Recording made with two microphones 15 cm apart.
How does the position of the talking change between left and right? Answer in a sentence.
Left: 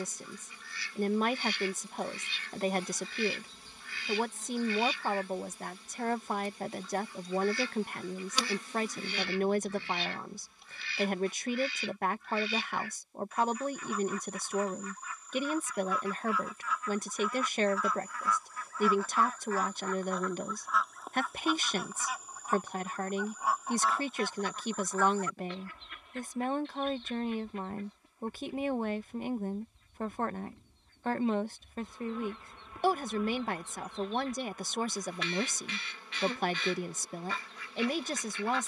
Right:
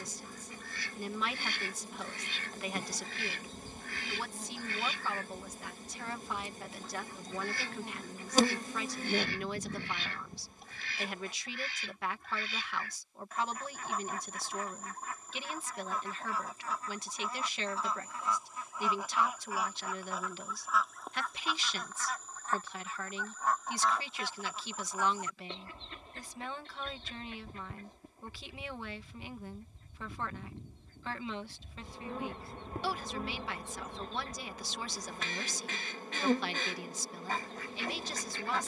In this clip you hear the talking stay put.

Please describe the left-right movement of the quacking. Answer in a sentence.
In this clip you hear the quacking go left and come back.